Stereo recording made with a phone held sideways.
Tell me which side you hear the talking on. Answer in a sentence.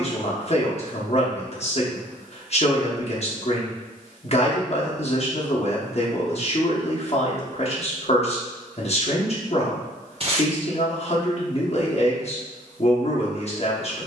In this clip you hear the talking on the left.